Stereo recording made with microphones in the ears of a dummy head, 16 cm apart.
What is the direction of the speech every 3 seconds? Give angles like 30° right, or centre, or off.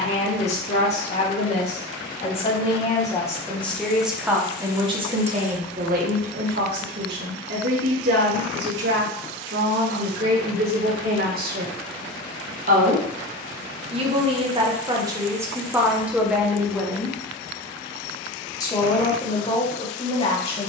40° left, 20° right, 70° right, 60° right, 30° right, 10° right, 30° left.